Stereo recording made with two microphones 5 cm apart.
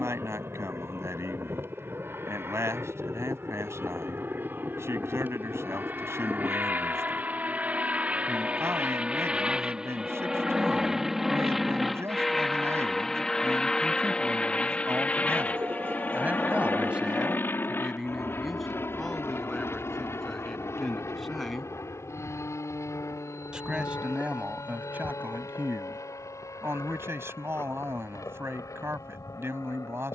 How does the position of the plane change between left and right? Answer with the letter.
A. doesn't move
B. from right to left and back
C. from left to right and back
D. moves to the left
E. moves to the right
D.